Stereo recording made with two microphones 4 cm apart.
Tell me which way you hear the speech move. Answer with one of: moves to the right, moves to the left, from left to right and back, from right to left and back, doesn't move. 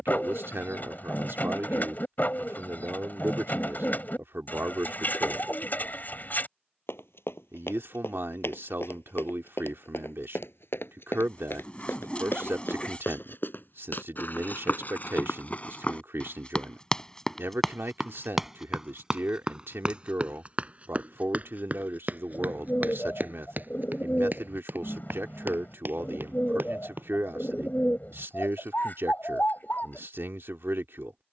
doesn't move.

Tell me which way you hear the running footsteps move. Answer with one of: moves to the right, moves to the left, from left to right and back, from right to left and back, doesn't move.
moves to the right.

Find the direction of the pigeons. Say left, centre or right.
left.